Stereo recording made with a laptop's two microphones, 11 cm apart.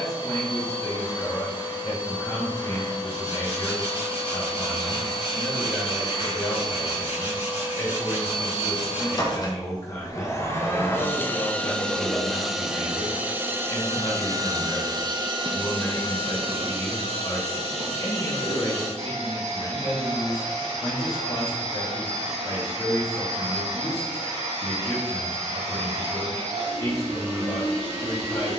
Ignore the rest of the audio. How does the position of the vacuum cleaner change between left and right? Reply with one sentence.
In this clip you hear the vacuum cleaner move to the right.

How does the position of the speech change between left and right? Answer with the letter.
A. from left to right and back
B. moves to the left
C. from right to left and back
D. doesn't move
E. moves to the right
D.